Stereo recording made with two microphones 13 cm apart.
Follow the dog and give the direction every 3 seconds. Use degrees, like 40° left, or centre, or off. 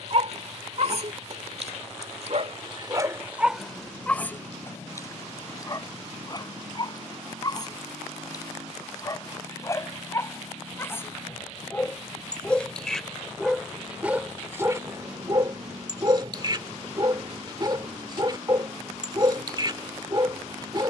50° right, 10° left, 30° left, 20° left, centre, 30° right, 30° right.